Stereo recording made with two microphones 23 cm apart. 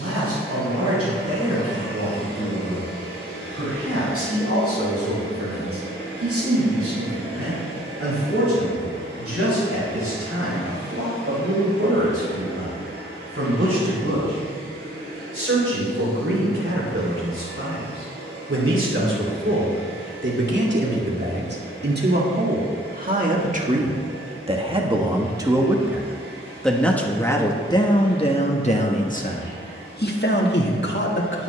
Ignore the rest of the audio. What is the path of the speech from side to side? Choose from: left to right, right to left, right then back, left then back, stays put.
right to left.